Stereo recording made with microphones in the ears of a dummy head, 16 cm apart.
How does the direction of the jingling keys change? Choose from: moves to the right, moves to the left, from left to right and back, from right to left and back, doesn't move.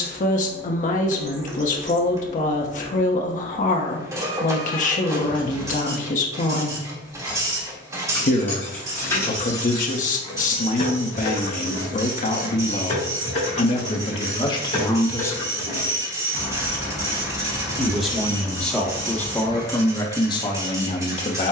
from right to left and back.